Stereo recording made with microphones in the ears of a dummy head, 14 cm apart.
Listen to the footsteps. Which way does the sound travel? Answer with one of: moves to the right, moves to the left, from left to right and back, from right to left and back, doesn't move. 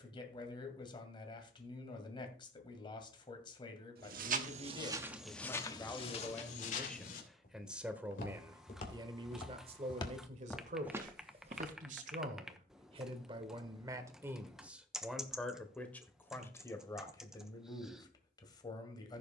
from right to left and back.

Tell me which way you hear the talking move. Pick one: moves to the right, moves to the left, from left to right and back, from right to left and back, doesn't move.
from left to right and back.